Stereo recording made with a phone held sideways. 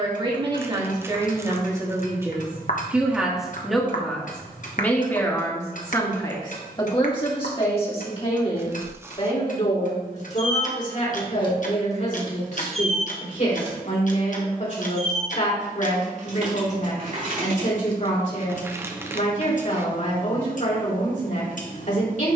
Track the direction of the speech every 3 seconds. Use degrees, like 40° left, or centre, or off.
20° right, 10° left, 30° left, 50° left, 50° left, 50° left, 50° left, 50° left.